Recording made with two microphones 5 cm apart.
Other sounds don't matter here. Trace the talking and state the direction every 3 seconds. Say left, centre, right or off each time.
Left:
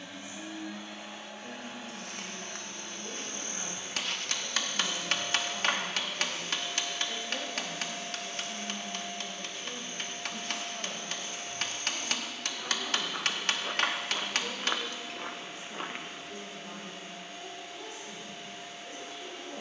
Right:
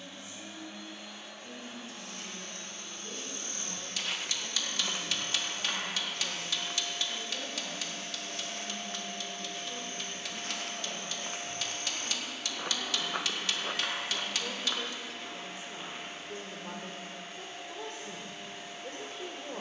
left, left, left, left, centre, right, right.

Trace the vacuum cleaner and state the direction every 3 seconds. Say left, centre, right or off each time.
left, left, left, centre, right, right, right.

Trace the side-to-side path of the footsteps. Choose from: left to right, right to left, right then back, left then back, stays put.
right then back.